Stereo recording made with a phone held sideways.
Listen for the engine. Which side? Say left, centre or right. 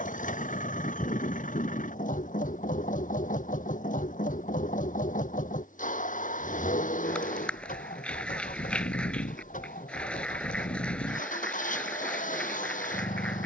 left.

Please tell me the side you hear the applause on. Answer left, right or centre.
centre.